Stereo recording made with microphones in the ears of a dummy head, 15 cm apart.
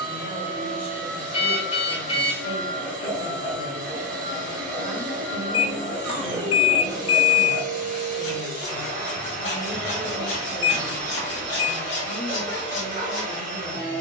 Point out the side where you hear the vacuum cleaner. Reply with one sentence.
In this clip you hear the vacuum cleaner on the right.